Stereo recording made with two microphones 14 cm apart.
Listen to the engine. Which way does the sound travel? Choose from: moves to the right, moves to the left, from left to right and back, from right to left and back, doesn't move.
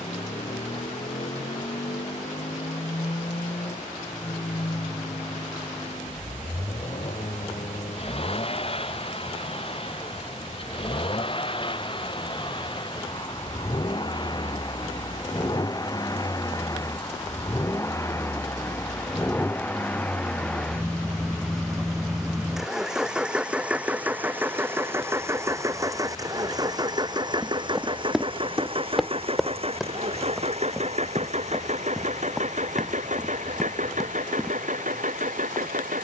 moves to the right.